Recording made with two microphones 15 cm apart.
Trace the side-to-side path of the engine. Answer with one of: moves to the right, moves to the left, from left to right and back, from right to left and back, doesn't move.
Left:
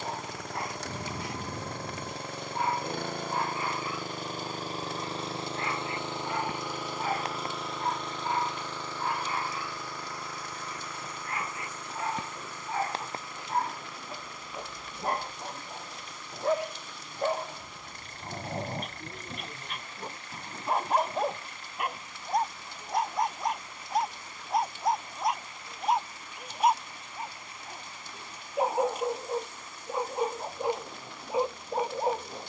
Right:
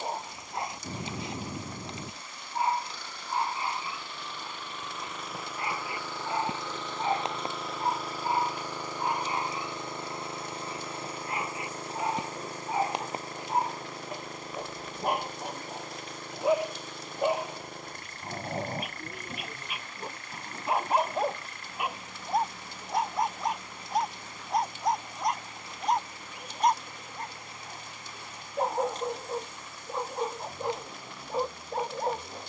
moves to the right.